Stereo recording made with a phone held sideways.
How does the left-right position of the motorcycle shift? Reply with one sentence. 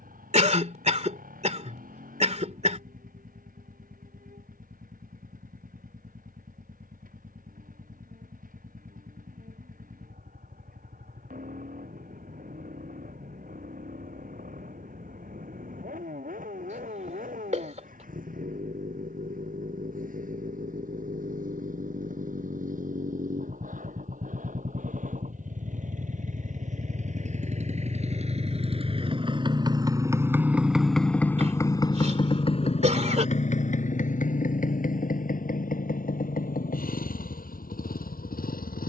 In this clip you hear the motorcycle move from right to left.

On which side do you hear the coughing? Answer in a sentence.
You can hear the coughing on the right.